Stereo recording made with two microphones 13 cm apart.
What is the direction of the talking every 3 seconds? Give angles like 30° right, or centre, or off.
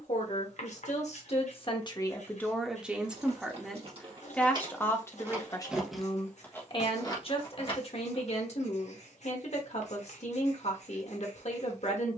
40° left, 10° left, 50° left, 50° left.